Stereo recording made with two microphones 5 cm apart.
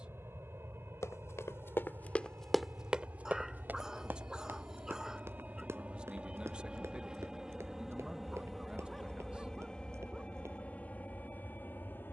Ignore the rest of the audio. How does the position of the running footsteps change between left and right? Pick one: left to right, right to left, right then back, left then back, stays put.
left to right.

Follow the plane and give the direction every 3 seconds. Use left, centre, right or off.
right, right, centre, left.